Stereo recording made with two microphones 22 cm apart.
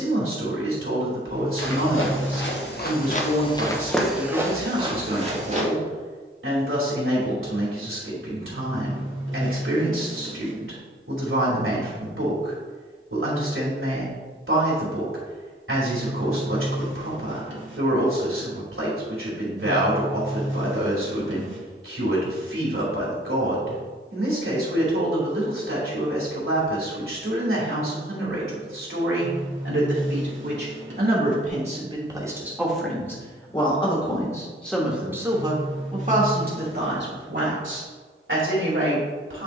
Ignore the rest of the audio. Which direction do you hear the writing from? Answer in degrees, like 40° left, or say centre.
60° right.